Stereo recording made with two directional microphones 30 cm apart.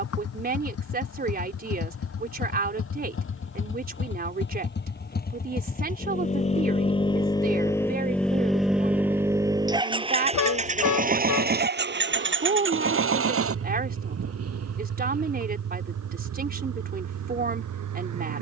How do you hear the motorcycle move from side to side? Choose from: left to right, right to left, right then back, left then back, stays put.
left to right.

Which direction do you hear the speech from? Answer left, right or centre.
right.